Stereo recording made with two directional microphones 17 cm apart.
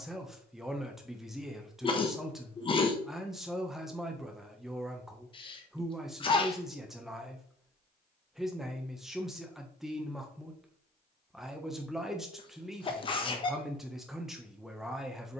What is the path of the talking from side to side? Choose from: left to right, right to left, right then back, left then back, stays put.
stays put.